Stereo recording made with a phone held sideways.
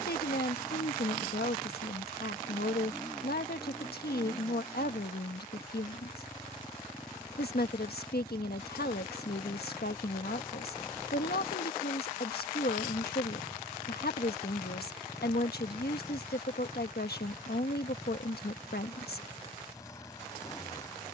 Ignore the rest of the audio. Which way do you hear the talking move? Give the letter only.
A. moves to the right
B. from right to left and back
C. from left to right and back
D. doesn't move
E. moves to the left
D.